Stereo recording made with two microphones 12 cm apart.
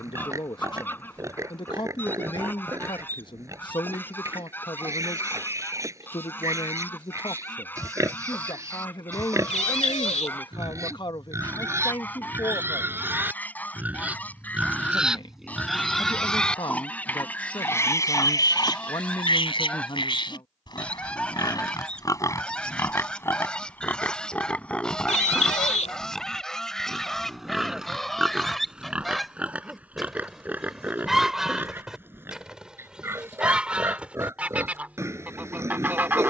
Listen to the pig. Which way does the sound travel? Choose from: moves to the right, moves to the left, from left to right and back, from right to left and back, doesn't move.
from right to left and back.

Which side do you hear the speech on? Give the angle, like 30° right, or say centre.
40° left.